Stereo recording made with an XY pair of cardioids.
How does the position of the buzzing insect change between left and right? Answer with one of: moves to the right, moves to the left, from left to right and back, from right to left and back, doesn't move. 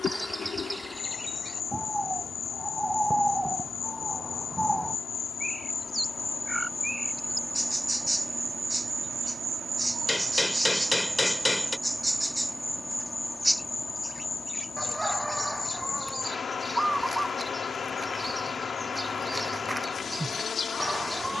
from left to right and back.